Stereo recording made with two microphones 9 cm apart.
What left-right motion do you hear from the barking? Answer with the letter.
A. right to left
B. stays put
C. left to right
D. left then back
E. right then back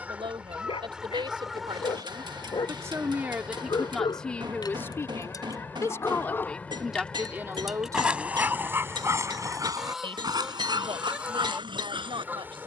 C.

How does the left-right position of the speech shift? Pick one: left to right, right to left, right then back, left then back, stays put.
left then back.